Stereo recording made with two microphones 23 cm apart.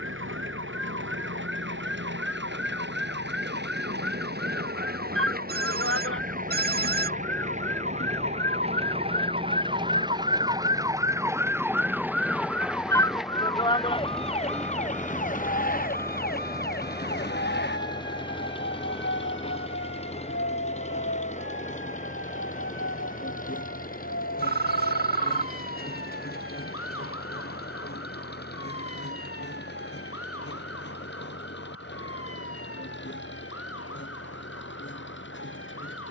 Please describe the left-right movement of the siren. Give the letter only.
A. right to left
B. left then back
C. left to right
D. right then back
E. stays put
A.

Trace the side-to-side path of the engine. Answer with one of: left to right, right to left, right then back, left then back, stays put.
right to left.